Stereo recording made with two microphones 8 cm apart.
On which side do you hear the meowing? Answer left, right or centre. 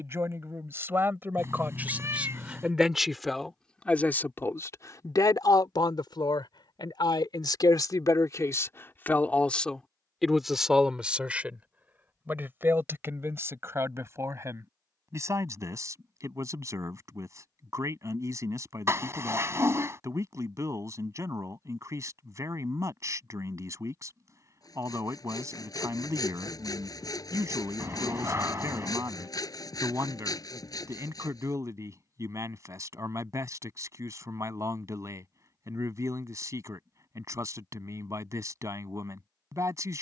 right.